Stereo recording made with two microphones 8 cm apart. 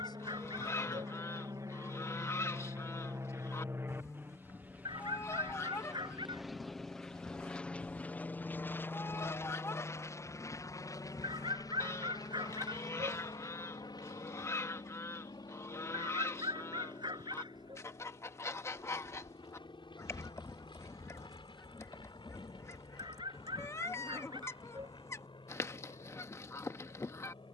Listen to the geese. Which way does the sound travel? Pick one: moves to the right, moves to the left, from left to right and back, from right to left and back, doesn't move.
doesn't move.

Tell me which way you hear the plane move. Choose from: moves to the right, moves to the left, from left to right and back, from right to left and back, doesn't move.
moves to the left.